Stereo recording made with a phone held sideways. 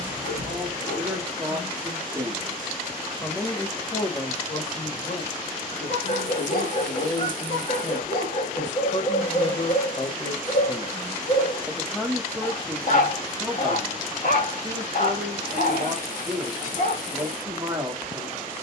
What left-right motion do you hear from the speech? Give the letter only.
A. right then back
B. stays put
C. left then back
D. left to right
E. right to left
C.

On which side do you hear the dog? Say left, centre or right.
left.